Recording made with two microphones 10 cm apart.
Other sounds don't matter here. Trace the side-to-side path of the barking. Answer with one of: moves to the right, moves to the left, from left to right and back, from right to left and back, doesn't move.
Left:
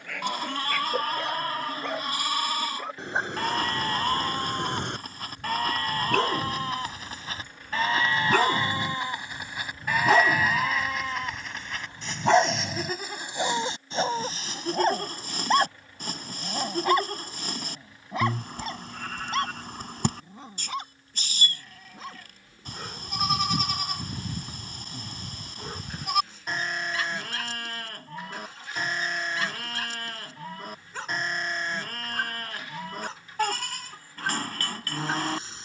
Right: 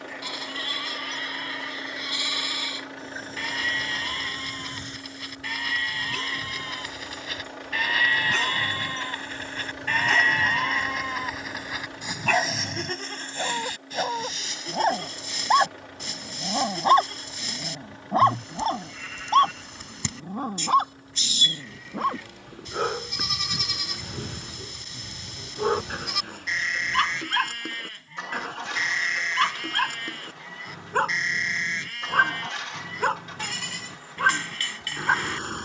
moves to the right.